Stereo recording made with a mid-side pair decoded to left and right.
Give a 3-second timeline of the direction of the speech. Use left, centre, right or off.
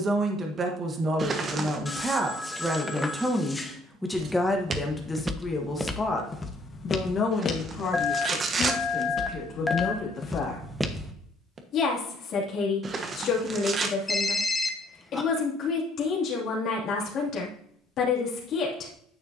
right, centre, left, left, left, left, left.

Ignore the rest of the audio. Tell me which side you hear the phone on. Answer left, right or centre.
centre.